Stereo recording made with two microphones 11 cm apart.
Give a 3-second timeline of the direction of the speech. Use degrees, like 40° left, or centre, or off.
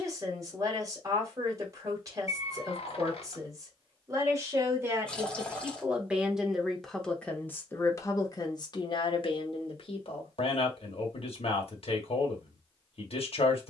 30° right, 30° right, 20° left, 60° left, 70° left.